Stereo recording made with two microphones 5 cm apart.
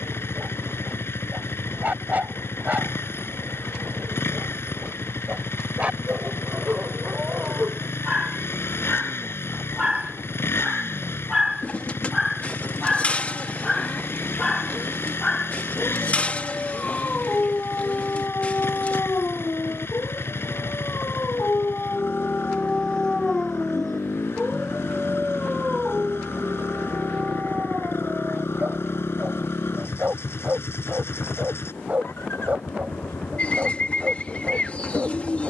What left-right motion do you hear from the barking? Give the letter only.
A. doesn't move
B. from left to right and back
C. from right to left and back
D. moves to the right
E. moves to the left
C.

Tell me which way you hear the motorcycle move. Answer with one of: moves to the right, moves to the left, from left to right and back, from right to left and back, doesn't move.
doesn't move.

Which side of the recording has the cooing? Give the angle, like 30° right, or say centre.
30° left.